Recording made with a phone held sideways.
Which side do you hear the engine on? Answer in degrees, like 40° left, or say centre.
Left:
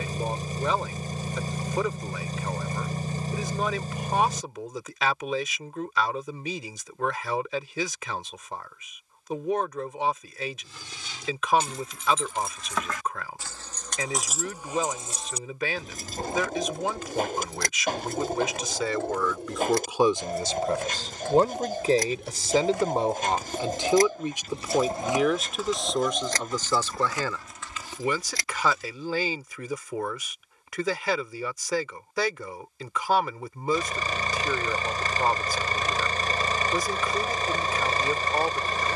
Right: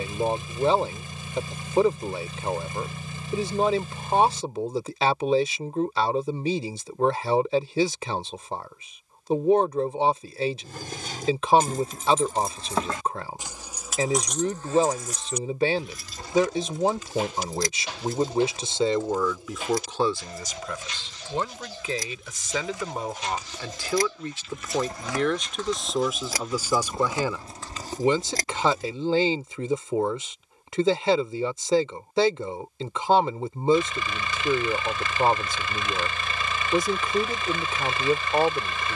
40° left.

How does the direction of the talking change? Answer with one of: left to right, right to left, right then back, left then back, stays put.
left then back.